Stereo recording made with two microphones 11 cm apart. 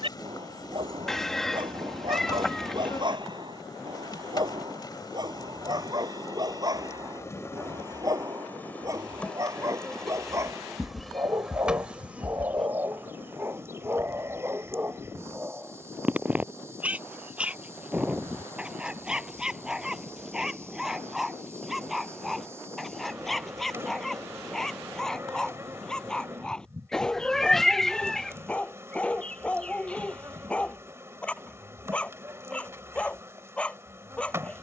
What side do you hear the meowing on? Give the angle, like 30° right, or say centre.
centre.